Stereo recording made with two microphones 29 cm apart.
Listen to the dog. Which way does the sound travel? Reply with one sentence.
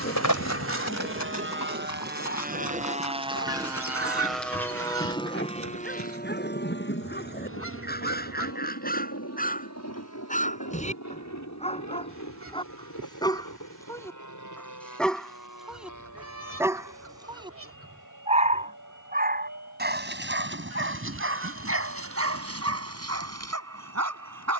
You can hear the dog travel towards the right.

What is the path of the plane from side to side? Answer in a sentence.
In this clip you hear the plane travel towards the left.